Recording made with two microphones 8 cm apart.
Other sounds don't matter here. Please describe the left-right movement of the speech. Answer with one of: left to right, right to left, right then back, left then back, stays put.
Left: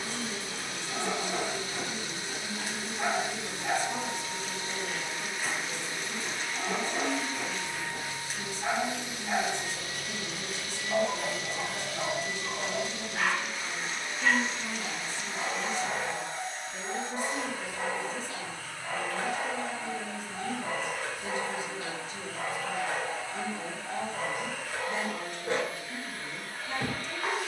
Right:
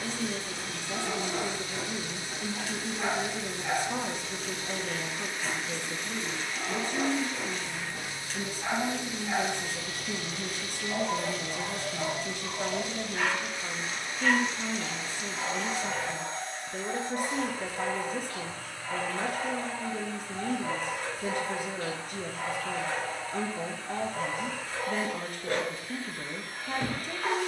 stays put.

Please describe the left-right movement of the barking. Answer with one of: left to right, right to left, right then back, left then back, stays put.
stays put.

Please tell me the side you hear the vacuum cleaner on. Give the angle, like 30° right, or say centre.
10° left.